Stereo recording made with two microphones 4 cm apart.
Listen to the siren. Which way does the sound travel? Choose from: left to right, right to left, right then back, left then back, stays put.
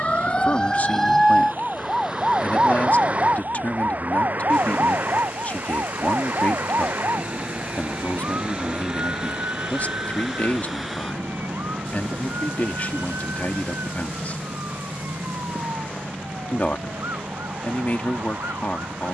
left to right.